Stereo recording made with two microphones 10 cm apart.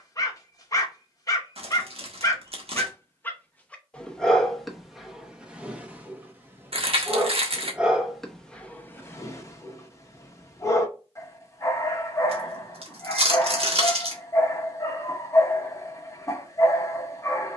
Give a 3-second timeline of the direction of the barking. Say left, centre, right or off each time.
left, centre, centre, left, left, left.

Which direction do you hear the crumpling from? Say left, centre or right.
right.